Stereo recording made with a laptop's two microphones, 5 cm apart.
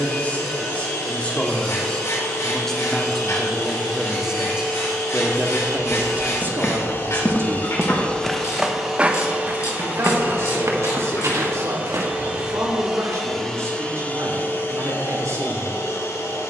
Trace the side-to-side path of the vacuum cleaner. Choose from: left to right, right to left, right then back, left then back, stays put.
right then back.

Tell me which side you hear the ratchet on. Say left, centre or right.
left.